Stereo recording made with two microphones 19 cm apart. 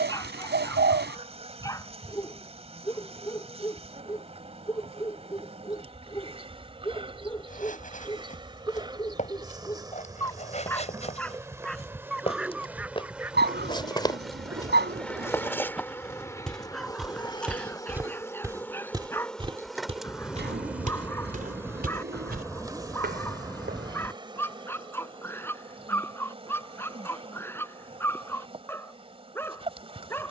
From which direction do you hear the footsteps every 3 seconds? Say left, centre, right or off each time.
off, off, left, left, left, centre, right, right, off, off.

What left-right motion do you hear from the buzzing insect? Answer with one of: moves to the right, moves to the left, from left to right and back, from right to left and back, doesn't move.
from right to left and back.